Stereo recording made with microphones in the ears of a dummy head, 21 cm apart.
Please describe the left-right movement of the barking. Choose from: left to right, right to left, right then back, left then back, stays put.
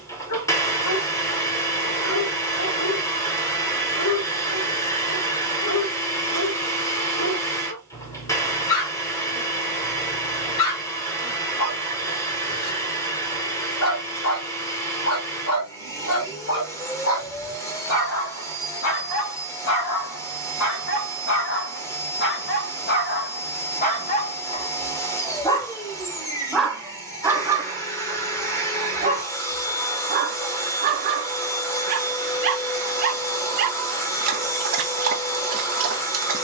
left to right.